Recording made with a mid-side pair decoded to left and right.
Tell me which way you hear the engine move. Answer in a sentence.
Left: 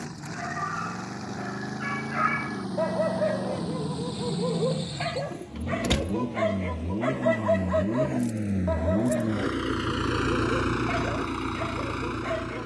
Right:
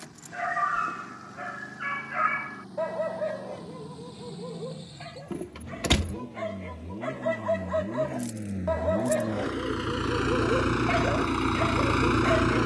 In this clip you hear the engine move from left to right.